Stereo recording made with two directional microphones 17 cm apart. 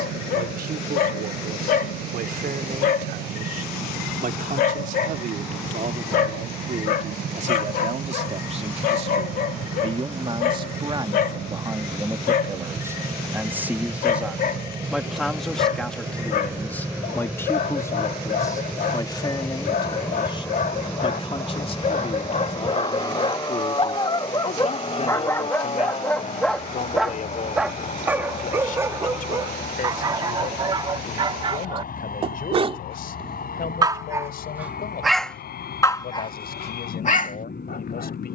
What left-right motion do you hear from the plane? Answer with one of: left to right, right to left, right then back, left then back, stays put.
right to left.